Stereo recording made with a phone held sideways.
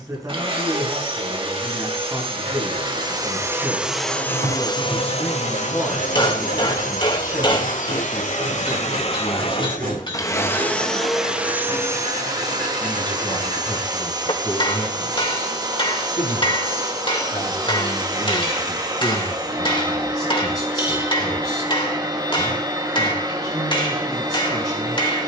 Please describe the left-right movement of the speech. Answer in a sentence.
You can hear the speech travel towards the left.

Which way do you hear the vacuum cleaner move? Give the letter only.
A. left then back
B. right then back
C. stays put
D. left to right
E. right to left
A.